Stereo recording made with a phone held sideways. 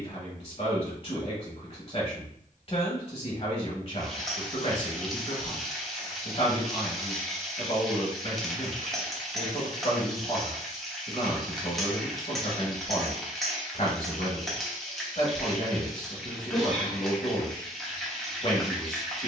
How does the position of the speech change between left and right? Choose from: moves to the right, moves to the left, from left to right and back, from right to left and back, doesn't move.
doesn't move.